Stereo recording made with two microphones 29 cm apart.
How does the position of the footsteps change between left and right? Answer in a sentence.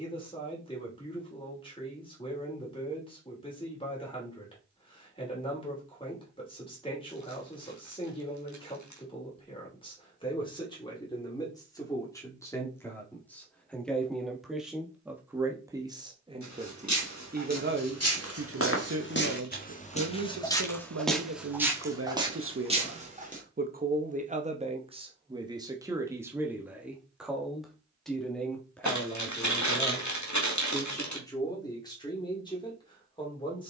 In this clip you hear the footsteps move from left to right.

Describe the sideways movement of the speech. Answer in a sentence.
You can hear the speech go right and come back.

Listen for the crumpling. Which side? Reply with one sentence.
In this clip you hear the crumpling on the left.